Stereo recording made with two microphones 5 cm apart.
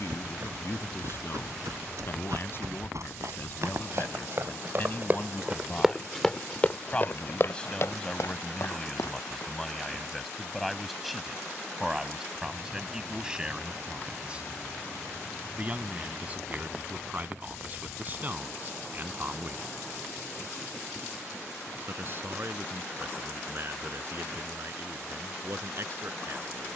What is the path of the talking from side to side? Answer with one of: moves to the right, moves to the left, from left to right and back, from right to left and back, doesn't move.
moves to the right.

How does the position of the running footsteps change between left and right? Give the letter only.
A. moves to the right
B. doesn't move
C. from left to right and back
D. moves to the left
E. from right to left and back
D.